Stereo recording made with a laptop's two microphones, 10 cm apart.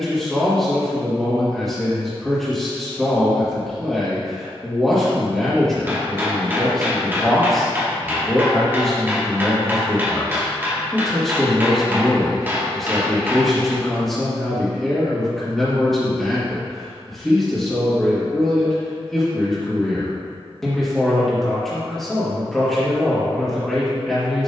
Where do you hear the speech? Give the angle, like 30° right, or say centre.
centre.